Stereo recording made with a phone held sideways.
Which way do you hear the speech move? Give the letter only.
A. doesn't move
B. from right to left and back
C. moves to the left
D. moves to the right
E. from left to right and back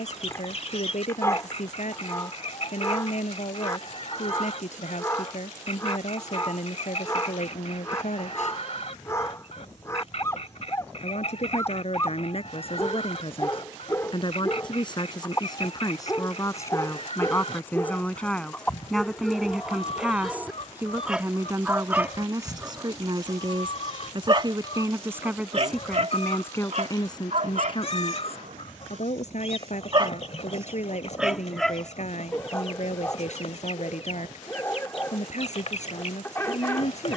E.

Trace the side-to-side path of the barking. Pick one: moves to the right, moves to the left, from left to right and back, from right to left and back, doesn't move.
from left to right and back.